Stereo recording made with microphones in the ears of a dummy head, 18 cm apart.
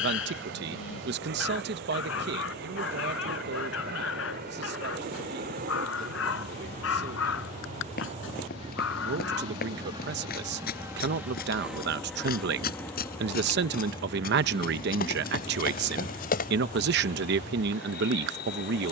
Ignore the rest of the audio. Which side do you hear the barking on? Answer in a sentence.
You can hear the barking on the left.